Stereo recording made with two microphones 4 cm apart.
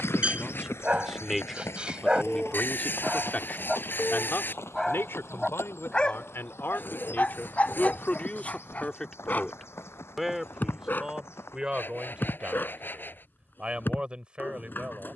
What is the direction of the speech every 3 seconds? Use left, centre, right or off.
centre, left, left, centre, right.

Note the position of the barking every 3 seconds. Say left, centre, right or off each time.
right, centre, left, left, left.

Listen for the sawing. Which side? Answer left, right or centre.
left.